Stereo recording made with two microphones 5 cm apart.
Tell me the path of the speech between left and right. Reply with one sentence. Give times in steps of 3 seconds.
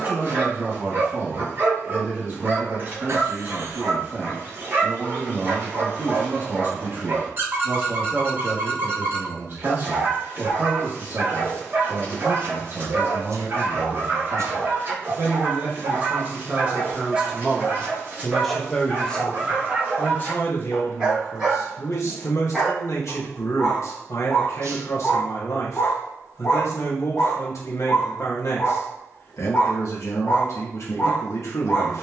You can hear the speech on the right from 0 s and on the left from 18 s.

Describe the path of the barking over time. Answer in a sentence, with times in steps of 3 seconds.
You can hear the barking on the right from 0 s, in the centre from 21 s and on the left from 24 s.